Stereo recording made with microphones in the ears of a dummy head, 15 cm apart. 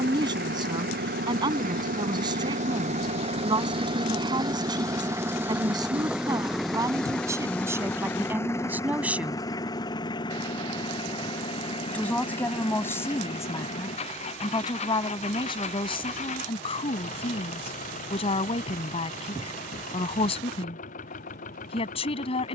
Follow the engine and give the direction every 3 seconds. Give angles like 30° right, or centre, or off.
60° right, 20° right, 10° left, 30° left, 40° left, 40° left, 50° left, 50° left.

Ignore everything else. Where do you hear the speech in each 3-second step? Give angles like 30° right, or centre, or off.
30° right, 30° right, 20° right, centre, 20° left, 30° left, 40° left, 40° left.